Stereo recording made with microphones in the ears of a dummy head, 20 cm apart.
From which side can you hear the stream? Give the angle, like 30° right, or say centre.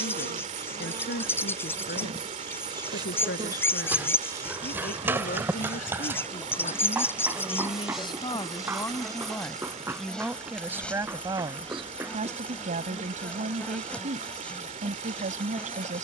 30° right.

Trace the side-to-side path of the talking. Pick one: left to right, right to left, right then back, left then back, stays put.
left to right.